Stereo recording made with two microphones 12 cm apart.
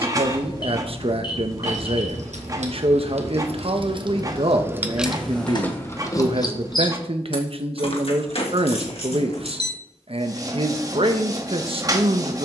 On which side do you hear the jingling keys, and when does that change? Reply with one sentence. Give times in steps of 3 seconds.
In this clip you hear the jingling keys on the right from 0 s and on the left from 6 s.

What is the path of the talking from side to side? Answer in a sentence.
In this clip you hear the talking stay in one place.